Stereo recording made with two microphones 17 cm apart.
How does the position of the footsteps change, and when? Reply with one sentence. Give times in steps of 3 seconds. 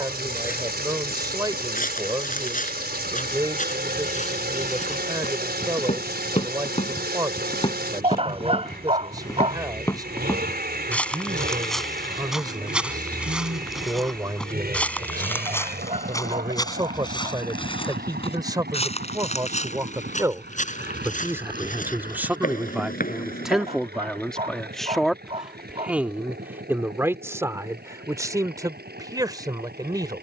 You can hear the footsteps on the left from 0 s, in the centre from 9 s, on the left from 15 s and not at all from 24 s.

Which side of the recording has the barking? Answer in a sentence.
In this clip you hear the barking on the right.